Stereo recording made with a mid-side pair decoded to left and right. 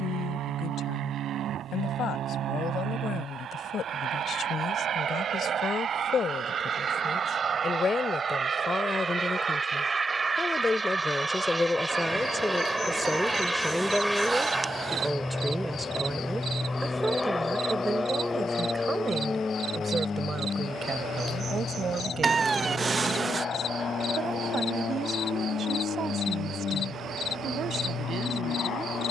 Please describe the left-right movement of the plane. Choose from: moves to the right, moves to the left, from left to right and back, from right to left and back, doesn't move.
moves to the left.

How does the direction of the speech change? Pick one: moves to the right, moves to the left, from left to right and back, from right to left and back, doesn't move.
moves to the right.